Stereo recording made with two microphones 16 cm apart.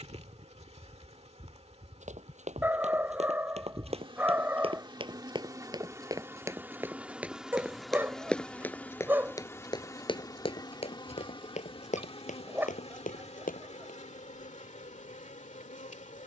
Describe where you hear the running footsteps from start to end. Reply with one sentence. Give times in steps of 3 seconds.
You can hear the running footsteps on the right from 0 s, in the centre from 6 s, on the left from 9 s and not at all from 15 s.